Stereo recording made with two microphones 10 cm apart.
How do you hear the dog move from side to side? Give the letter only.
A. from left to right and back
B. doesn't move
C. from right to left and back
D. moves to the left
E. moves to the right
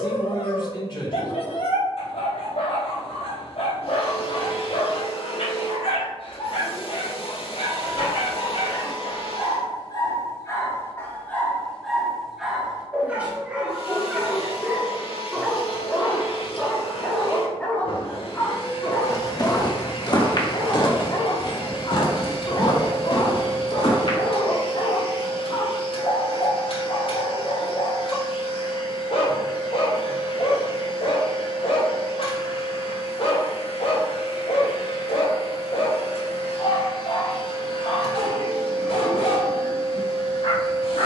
A.